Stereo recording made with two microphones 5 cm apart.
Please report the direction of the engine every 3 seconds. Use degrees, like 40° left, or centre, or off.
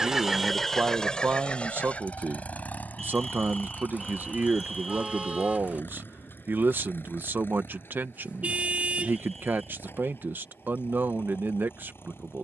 20° left, 40° left, 50° left, 50° left.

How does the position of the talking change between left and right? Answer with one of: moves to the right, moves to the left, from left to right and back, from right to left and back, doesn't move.
doesn't move.